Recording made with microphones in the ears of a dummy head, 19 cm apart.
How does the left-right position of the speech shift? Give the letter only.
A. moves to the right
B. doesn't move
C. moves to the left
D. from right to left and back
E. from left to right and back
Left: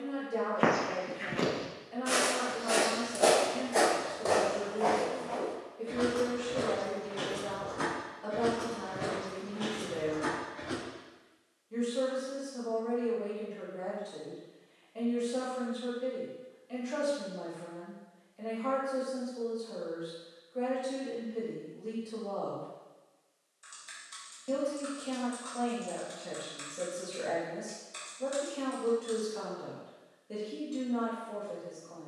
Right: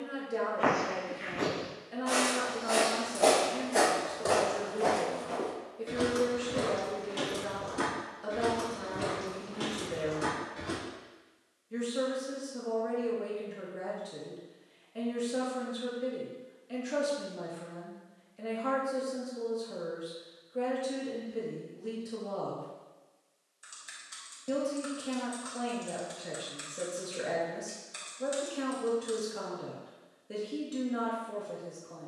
B.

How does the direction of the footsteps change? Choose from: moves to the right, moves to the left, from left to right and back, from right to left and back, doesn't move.
moves to the right.